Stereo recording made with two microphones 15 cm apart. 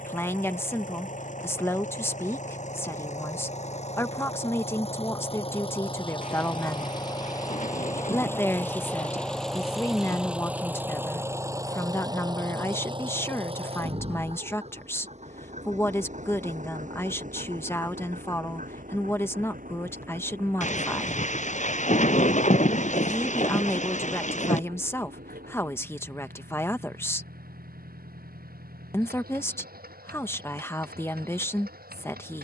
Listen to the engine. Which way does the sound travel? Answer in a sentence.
In this clip you hear the engine travel towards the right.